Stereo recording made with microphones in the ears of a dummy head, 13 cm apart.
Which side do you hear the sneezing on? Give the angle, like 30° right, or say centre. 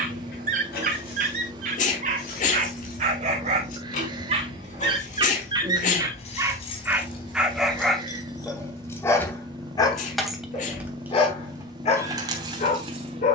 60° left.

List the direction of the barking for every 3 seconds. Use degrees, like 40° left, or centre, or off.
60° right, 40° right, 10° right, 30° left, 50° left.